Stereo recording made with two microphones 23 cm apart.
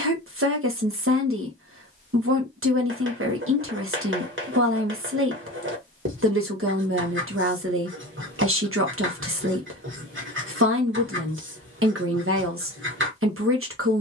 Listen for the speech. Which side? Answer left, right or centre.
right.